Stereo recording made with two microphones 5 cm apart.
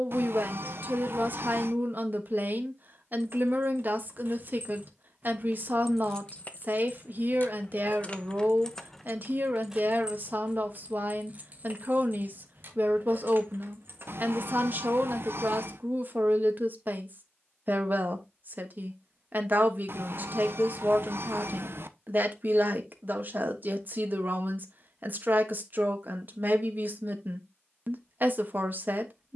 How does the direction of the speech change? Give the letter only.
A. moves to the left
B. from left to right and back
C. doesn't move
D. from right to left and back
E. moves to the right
C.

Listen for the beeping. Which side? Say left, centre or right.
right.